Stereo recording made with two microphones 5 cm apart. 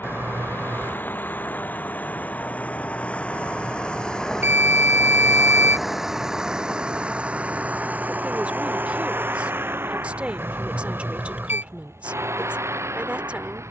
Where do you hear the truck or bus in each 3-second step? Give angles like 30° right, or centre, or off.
40° left, 10° left, 30° right, 50° right, 70° right.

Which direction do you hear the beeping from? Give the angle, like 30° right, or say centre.
50° right.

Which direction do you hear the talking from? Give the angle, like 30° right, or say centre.
30° right.